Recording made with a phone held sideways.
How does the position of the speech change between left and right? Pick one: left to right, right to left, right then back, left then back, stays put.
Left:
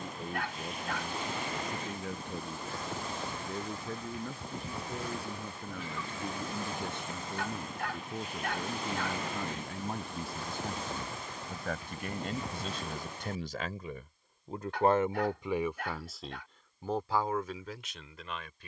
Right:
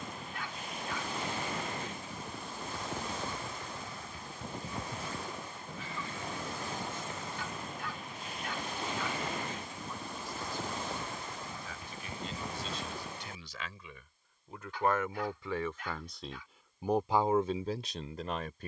left to right.